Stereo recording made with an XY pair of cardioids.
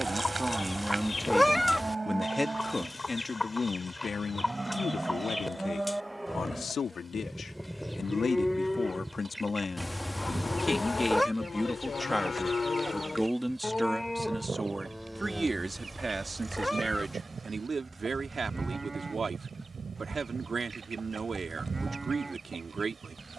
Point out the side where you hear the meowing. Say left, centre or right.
centre.